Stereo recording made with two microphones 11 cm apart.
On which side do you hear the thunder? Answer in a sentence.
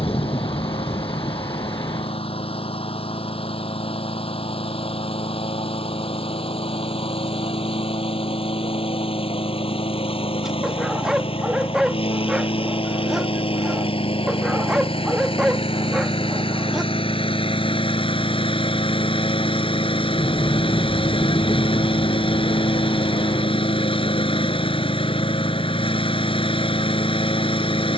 You can hear the thunder on the left.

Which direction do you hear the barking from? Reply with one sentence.
In this clip you hear the barking in the centre.